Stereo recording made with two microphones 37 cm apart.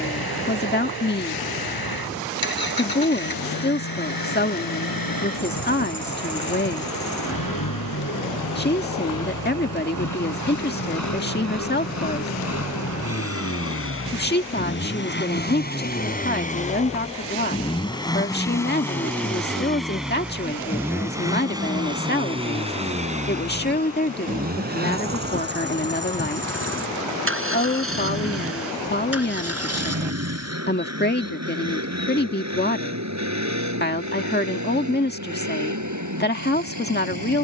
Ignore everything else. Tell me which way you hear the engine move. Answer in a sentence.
In this clip you hear the engine travel towards the right.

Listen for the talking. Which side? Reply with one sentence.
You can hear the talking on the left.